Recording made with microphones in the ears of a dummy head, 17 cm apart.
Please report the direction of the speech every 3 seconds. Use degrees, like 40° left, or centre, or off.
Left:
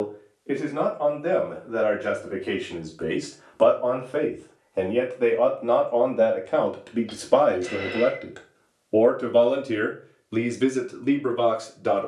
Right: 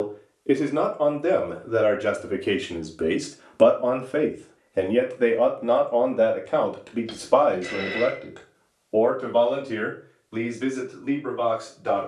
50° right, 20° right, 10° left, 40° left.